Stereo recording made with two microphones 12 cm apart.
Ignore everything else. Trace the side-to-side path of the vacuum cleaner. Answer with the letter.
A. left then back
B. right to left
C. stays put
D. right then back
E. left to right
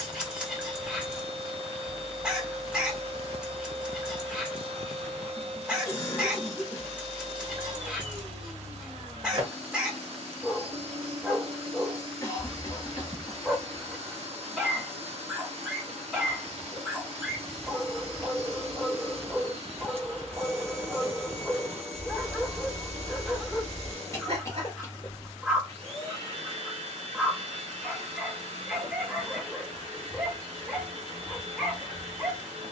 C.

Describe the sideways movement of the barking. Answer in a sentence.
In this clip you hear the barking stay put.